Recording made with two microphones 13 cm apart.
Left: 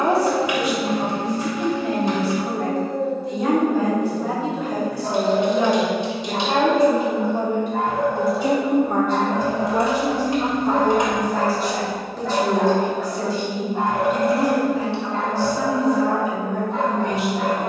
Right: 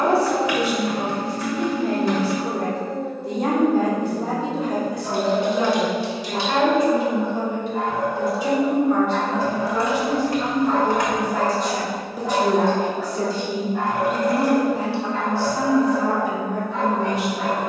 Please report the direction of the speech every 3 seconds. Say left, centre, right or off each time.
right, right, left, left, right, right.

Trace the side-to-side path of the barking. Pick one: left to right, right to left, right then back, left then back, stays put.
right then back.